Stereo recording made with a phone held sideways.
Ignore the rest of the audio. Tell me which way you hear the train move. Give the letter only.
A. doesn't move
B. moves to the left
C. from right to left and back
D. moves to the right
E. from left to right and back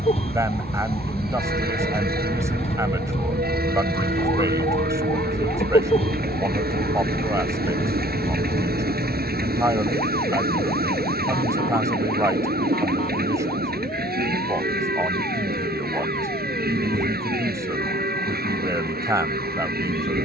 A.